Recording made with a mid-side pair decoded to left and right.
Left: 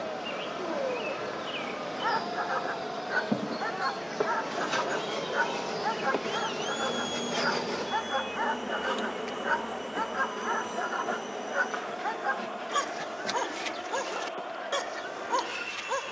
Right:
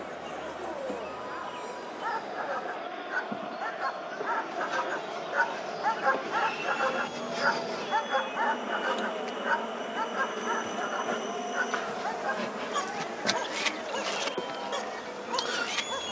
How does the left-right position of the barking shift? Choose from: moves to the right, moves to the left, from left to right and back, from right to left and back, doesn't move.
from left to right and back.